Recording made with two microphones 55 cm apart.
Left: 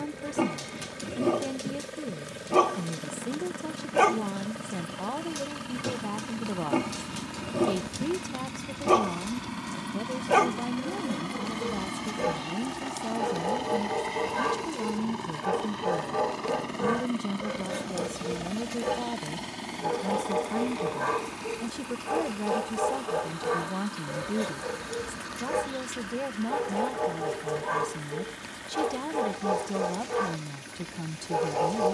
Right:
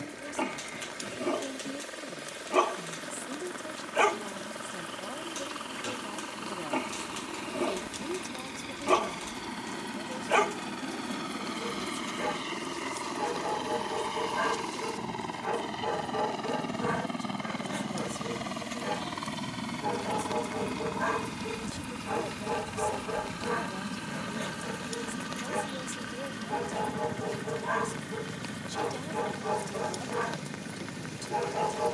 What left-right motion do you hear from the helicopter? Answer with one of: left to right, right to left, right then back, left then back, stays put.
left to right.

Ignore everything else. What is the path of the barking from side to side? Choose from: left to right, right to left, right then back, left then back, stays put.
stays put.